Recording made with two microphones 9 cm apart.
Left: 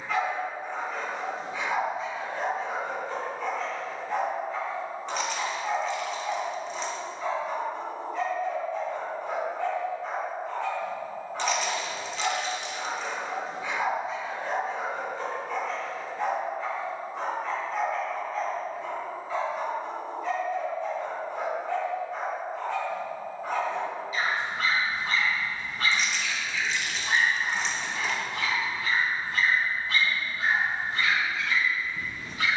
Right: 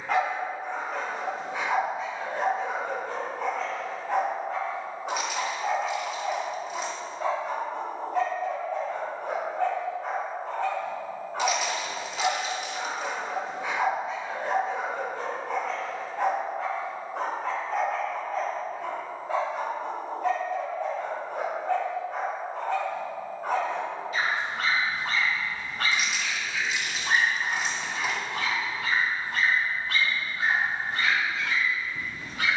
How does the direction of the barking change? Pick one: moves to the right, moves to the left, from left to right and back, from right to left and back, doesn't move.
doesn't move.